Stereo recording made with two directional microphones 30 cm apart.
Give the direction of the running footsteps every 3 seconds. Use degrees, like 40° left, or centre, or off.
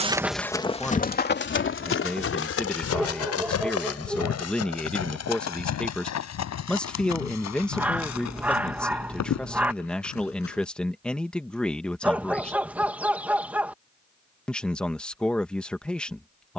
30° left, 50° left, 60° left, 60° left, off, off.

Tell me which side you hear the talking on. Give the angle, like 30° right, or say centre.
centre.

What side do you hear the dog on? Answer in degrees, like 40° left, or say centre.
centre.